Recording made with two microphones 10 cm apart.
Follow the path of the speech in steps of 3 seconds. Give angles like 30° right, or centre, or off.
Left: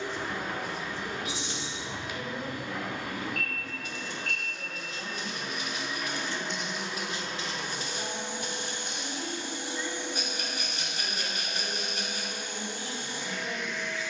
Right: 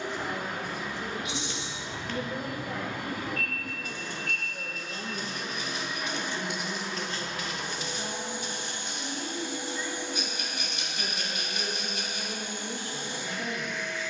50° right, 40° right, centre, centre, 50° right.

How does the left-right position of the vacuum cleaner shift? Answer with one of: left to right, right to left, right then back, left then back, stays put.
stays put.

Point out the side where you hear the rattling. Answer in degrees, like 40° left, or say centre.
40° left.